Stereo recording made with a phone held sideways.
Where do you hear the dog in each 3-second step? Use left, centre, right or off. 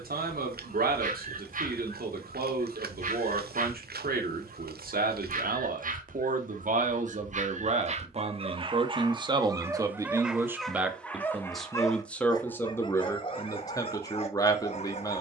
right, right, right, centre, left.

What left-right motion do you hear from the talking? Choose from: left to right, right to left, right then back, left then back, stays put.
right to left.